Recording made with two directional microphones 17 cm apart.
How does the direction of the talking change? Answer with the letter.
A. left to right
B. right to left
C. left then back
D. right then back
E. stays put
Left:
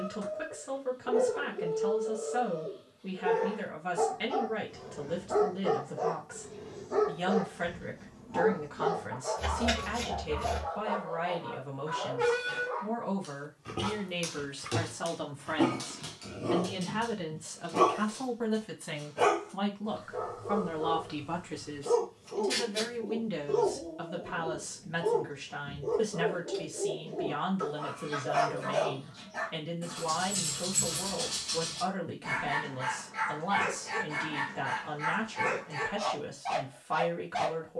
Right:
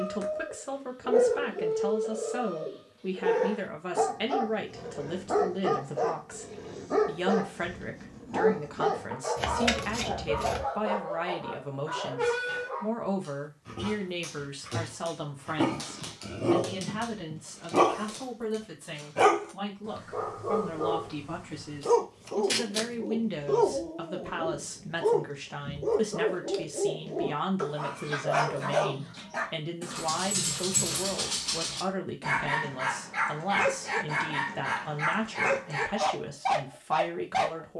C.